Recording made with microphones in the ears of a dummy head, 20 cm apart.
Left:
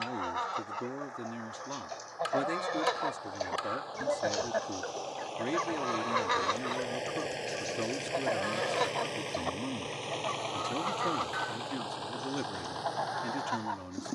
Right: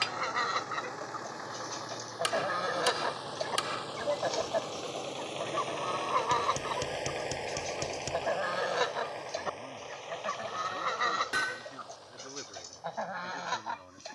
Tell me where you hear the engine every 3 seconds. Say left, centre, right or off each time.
right, right, centre, left, left.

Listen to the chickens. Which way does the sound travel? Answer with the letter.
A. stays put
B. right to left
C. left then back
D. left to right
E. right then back
C.